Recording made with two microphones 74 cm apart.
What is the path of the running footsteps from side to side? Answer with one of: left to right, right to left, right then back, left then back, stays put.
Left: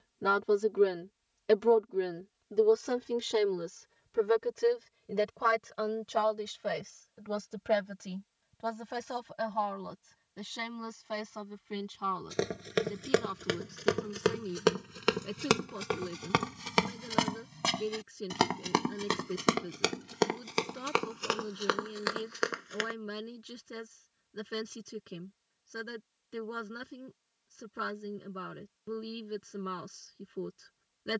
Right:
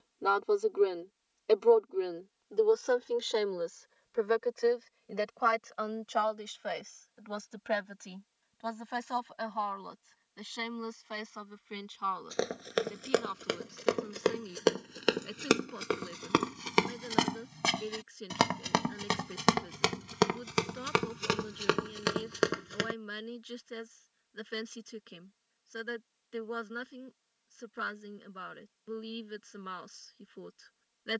left to right.